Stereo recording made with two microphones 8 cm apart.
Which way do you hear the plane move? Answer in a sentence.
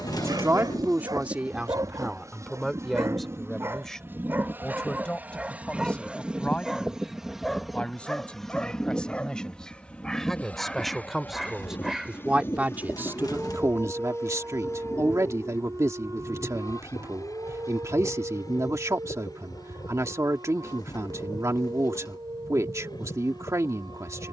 In this clip you hear the plane move from right to left.